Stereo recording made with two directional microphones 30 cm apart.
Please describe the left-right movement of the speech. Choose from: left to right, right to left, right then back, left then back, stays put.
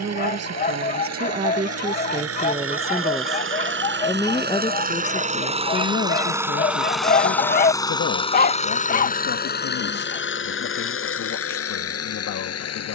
right to left.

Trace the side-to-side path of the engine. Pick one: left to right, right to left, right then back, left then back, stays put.
right to left.